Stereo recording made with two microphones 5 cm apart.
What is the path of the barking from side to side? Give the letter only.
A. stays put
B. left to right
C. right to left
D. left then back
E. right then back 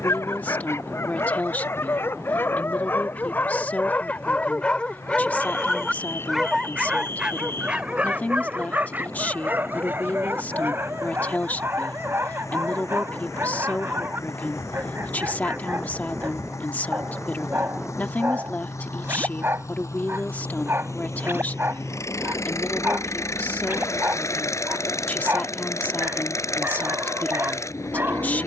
B.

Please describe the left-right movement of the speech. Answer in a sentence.
In this clip you hear the speech stay in one place.